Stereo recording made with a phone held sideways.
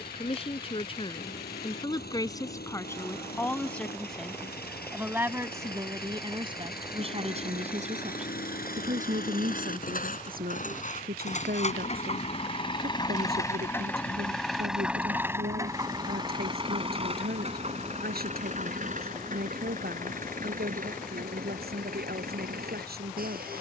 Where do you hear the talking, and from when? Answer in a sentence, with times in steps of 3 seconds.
You can hear the talking on the left from 0 s, in the centre from 3 s and on the right from 6 s.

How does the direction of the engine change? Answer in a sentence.
In this clip you hear the engine travel towards the right.